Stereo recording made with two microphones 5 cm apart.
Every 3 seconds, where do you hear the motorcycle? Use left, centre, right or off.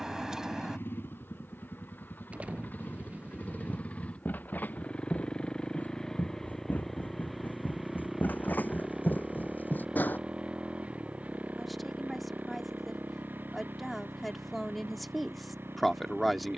left, left, centre, right, right, right.